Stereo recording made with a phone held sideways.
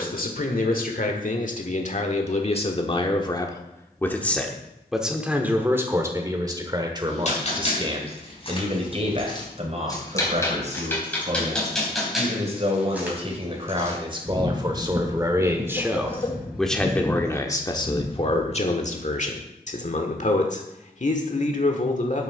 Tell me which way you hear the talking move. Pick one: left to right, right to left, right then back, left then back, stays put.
right then back.